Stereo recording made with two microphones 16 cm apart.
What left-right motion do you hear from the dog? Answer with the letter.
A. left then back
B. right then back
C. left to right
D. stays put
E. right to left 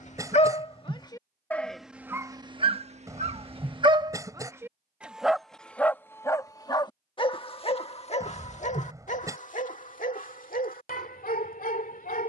B.